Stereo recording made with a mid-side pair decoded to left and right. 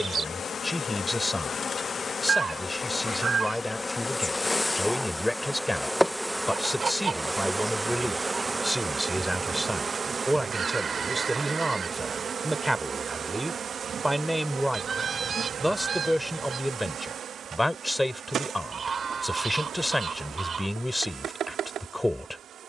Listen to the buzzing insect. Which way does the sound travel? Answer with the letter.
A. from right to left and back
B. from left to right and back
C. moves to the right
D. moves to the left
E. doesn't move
C.